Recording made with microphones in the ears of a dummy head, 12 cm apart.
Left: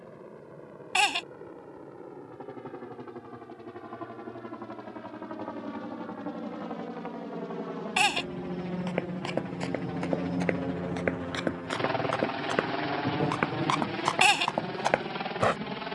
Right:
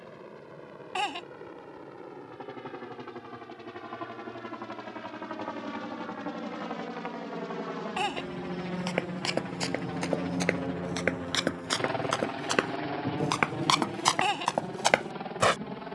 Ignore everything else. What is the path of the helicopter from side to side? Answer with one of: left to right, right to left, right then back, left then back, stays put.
right to left.